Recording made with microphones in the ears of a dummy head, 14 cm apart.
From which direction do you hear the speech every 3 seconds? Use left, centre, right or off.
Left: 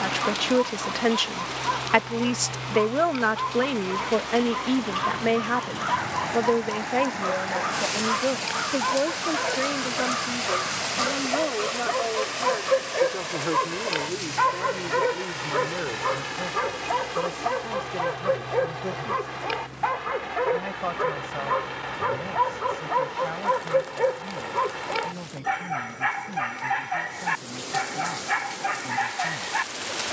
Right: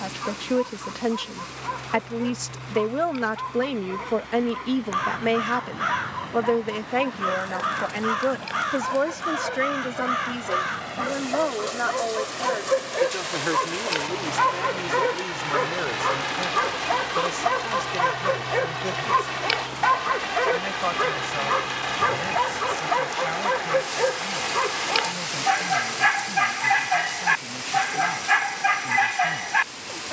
left, centre, right, right, right, right, right, right, right, right.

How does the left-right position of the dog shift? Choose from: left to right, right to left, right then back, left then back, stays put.
left to right.